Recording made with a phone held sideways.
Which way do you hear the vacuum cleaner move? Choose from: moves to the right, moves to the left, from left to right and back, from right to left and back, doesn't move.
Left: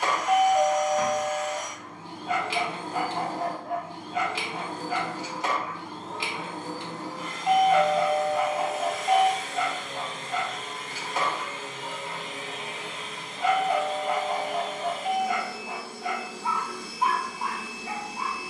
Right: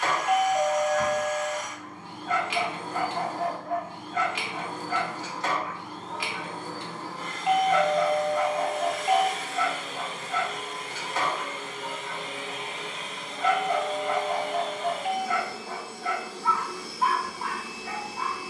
moves to the right.